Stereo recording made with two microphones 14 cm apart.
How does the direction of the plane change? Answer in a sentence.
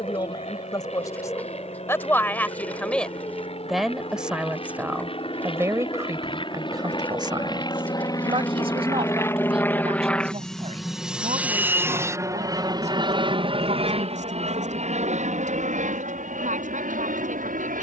In this clip you hear the plane move from left to right.